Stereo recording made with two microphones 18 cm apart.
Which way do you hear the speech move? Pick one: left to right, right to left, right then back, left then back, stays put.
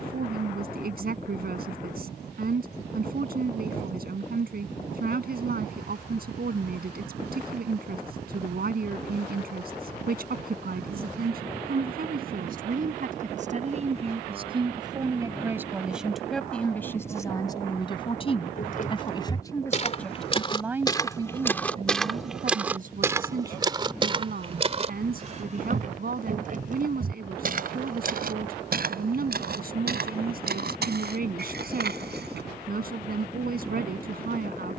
left then back.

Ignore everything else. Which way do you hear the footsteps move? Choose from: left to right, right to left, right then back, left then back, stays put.
left to right.